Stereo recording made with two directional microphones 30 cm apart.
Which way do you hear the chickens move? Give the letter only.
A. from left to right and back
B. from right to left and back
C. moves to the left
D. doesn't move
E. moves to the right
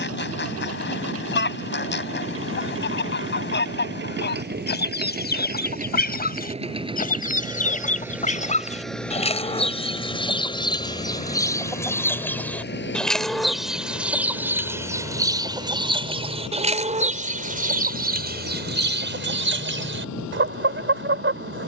E.